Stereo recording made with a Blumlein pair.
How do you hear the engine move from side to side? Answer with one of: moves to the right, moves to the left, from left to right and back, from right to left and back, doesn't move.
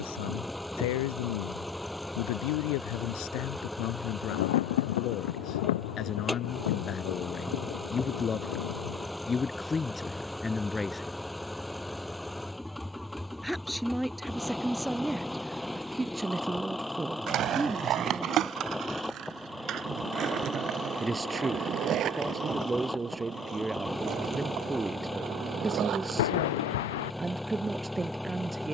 doesn't move.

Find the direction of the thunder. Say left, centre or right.
left.